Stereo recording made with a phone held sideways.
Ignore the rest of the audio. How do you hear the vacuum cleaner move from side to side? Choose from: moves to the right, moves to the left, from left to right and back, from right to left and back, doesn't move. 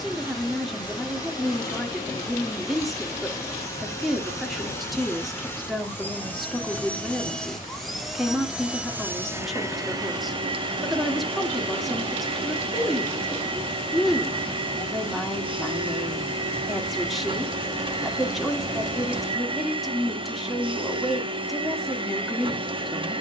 moves to the right.